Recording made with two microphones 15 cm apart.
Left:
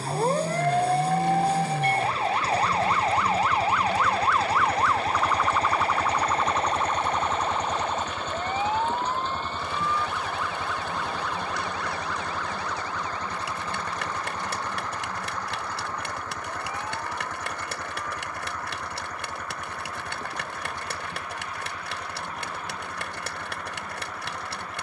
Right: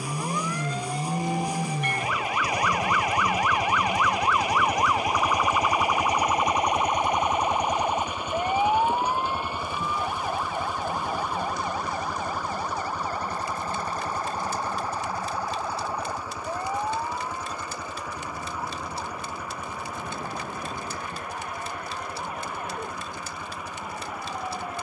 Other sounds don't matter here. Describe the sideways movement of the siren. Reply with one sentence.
You can hear the siren travel towards the right.